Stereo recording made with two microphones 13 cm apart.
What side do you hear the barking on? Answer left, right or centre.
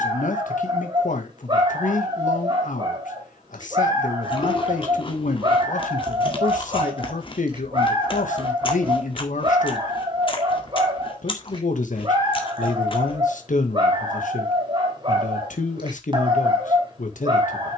right.